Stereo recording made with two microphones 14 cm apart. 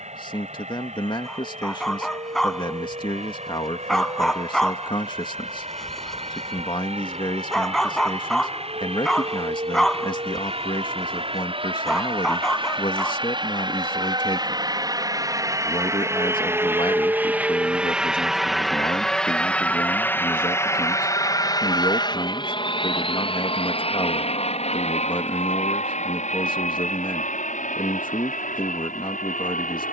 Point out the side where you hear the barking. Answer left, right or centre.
centre.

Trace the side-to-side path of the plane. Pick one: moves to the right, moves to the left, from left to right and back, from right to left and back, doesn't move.
moves to the left.